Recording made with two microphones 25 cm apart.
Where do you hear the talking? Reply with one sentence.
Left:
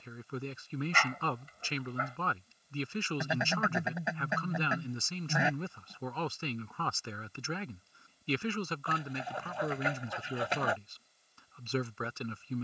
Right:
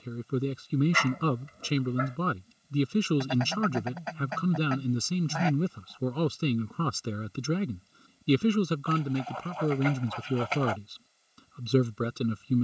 You can hear the talking on the right.